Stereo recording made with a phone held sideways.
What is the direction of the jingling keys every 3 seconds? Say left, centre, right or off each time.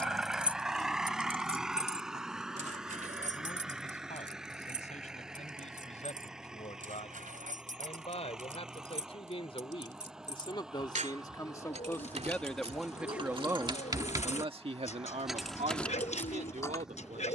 right, right, right, right, right, centre.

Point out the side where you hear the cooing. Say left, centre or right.
left.